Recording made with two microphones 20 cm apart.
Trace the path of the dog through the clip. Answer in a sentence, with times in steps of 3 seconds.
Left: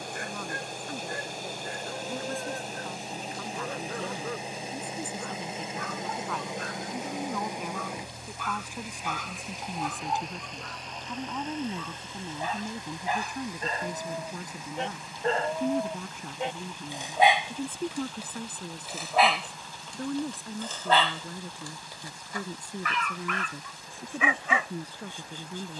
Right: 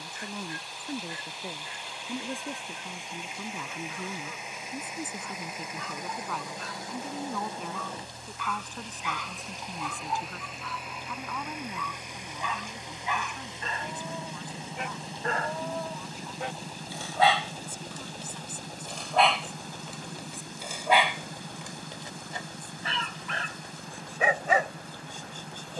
In this clip you hear the dog on the left from 0 s, in the centre from 18 s and on the right from 21 s.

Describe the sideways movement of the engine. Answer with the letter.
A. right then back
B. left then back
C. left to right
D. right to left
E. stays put
C.